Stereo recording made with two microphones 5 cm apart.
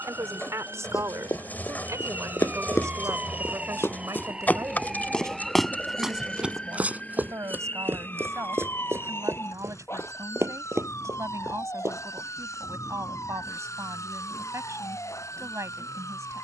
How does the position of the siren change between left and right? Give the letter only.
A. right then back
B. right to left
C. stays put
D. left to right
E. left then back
B.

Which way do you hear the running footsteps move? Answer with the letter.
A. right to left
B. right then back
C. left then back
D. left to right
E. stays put
D.